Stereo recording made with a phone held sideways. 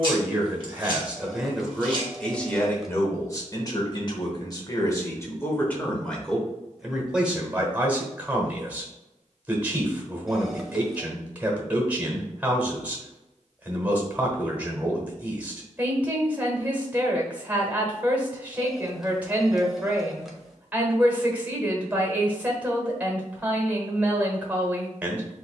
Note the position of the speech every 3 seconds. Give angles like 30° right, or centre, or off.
centre, 30° left, 10° right, 10° right, 10° right, 10° right, 10° right, 10° right, 10° right.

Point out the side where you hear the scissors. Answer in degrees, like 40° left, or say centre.
40° right.